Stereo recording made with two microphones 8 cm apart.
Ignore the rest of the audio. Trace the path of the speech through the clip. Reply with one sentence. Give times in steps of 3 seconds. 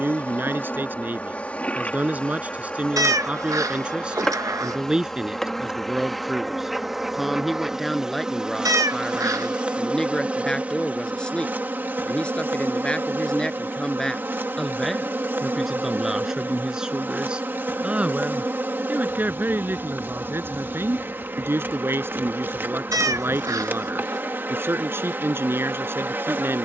In this clip you hear the speech on the right from 0 s, in the centre from 3 s and on the right from 18 s.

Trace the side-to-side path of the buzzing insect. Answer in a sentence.
You can hear the buzzing insect move from left to right.